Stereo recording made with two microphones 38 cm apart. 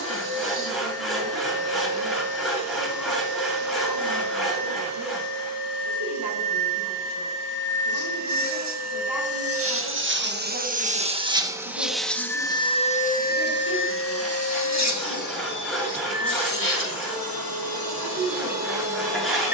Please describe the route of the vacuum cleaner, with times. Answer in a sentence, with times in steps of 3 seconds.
You can hear the vacuum cleaner on the right from 0 s and on the left from 12 s.